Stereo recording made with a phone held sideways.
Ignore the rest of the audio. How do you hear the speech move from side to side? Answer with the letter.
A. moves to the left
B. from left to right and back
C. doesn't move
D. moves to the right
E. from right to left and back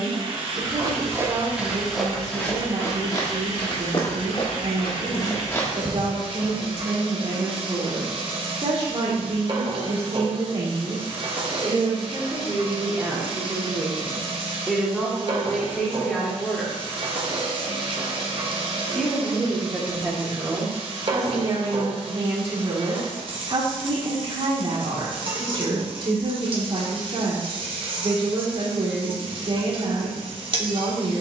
E.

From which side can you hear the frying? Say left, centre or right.
right.